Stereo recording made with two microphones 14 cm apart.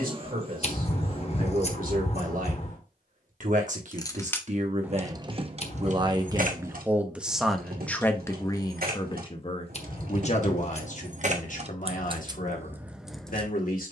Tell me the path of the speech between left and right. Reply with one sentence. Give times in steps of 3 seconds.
You can hear the speech on the right from 0 s, in the centre from 6 s and on the left from 9 s.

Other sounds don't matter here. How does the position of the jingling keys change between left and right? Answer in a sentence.
You can hear the jingling keys go right and come back.